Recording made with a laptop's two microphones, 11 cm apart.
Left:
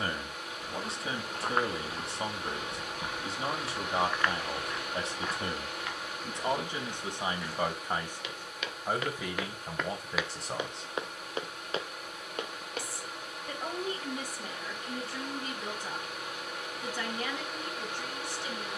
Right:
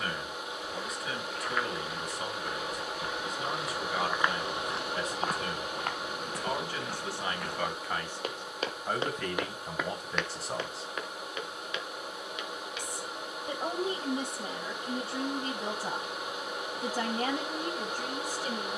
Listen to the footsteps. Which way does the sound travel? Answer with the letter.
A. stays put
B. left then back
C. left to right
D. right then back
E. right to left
D.